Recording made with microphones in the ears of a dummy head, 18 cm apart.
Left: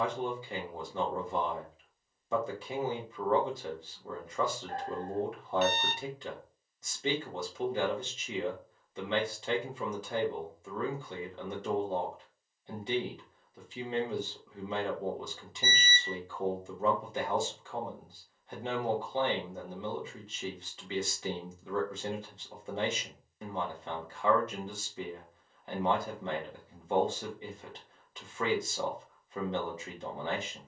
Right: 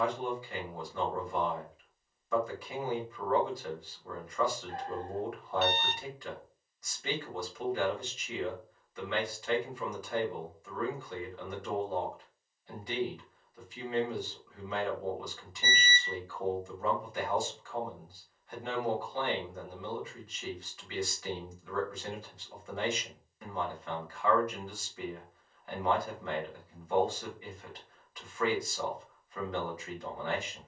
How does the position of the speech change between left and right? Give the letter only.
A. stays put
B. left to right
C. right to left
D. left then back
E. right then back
A.